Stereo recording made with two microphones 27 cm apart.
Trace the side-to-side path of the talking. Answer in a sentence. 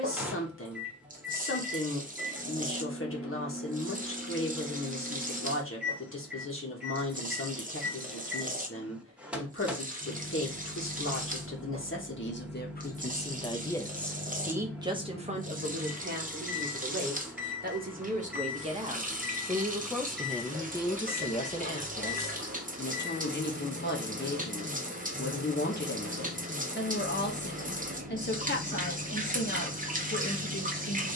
In this clip you hear the talking move from left to right and back again.